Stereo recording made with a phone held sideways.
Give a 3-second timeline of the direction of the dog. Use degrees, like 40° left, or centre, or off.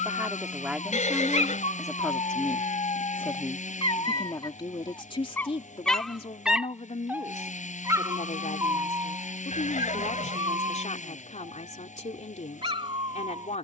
60° left, 30° left, 20° right, 40° right, 40° right.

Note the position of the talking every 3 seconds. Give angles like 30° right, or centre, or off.
centre, 30° left, 60° left, 60° left, 60° left.